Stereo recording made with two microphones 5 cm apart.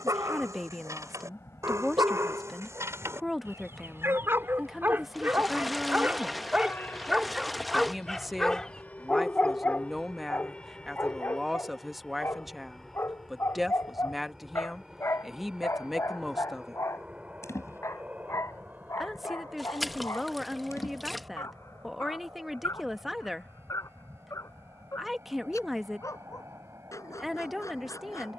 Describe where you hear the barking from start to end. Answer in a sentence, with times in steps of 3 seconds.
You can hear the barking on the right from 0 s, in the centre from 6 s and on the left from 9 s.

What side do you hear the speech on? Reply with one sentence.
In this clip you hear the speech in the centre.